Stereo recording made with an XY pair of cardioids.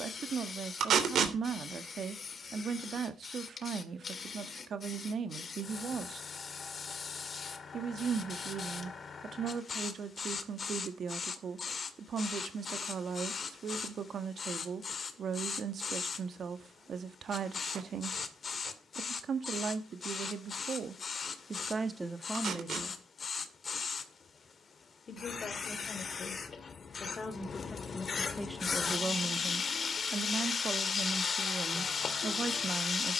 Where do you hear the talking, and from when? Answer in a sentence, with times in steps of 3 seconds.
In this clip you hear the talking on the right from 0 s, in the centre from 21 s, on the left from 24 s, in the centre from 27 s and on the right from 30 s.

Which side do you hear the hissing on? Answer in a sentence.
In this clip you hear the hissing on the left.